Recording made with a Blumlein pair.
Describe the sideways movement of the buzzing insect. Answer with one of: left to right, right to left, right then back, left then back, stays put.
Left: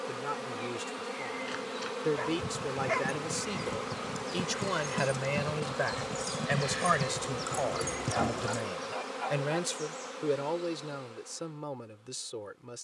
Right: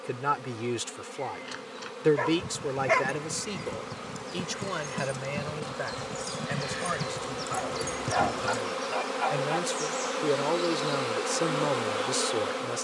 left to right.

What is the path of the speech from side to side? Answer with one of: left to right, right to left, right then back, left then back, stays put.
left then back.